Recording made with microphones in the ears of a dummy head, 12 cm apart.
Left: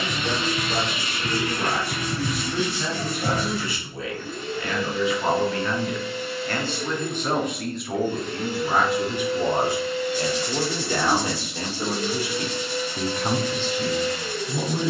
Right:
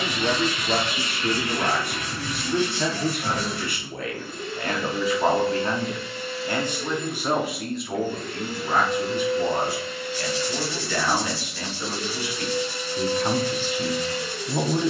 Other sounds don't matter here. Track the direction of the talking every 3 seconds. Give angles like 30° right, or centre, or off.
50° right, 40° right, centre, 20° left, 10° right.